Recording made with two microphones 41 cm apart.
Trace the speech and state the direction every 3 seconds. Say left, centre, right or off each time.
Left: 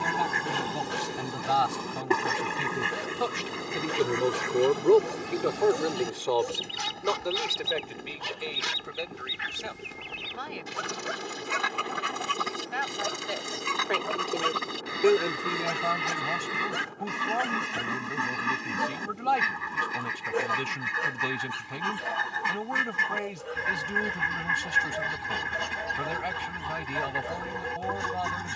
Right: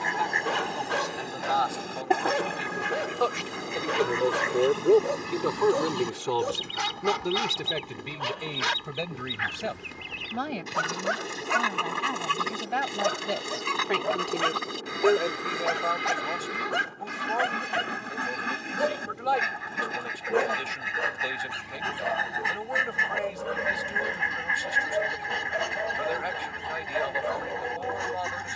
left, centre, right, right, right, left, left, left, left, left.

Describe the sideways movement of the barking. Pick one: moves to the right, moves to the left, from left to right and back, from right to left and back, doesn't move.
doesn't move.